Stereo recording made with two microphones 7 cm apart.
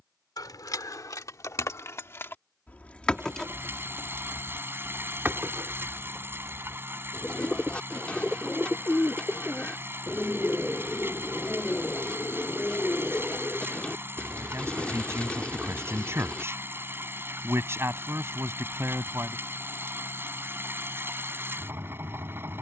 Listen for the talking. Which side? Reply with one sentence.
You can hear the talking on the right.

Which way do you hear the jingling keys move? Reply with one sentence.
You can hear the jingling keys go from the left side to the right.